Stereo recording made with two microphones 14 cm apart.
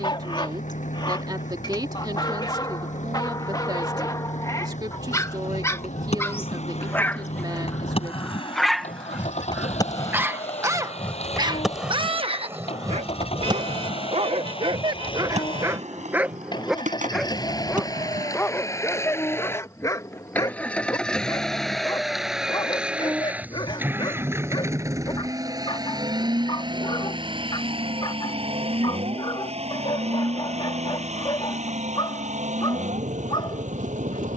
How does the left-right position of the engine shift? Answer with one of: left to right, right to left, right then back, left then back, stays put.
left to right.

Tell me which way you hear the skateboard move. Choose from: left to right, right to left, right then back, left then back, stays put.
left to right.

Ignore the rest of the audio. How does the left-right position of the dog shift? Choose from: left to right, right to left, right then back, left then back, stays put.
right then back.